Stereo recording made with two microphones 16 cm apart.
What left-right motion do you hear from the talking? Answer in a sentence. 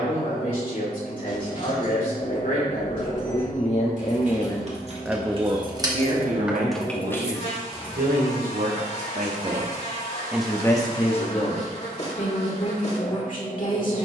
You can hear the talking go right and come back.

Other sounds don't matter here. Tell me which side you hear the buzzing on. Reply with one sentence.
In this clip you hear the buzzing on the left.